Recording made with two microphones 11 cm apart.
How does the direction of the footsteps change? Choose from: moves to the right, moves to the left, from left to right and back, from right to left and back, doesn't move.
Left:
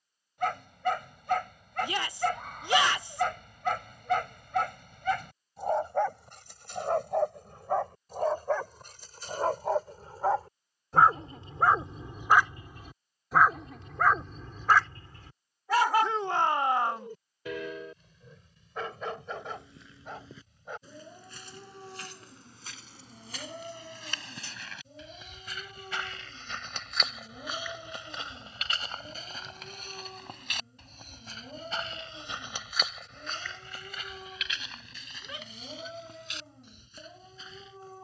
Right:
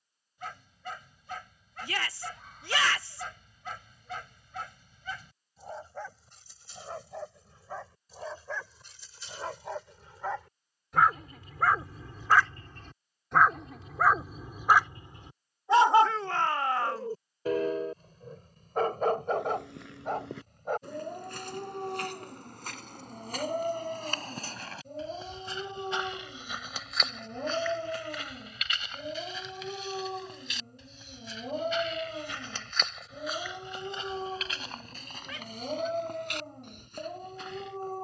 from right to left and back.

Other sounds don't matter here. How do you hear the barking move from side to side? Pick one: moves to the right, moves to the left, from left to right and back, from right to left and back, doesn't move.
moves to the right.